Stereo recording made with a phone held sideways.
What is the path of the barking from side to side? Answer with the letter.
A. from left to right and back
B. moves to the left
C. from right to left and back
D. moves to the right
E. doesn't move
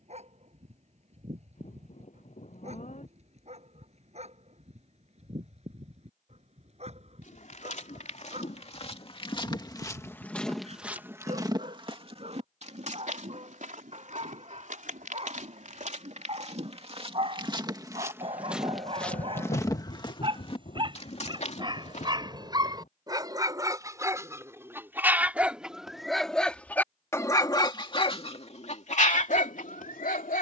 B.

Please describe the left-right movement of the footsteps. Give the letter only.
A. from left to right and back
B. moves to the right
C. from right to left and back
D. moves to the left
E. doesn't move
A.